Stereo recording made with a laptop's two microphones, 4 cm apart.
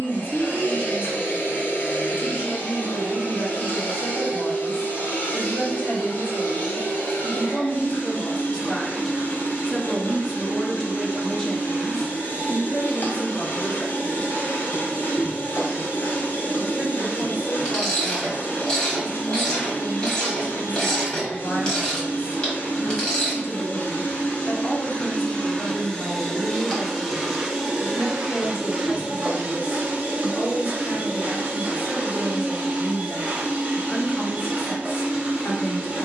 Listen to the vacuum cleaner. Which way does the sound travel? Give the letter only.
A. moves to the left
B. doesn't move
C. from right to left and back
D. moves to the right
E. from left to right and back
D.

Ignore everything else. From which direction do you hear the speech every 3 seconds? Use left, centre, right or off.
left, left, left, centre, left, left, left, left, left, left, left, left.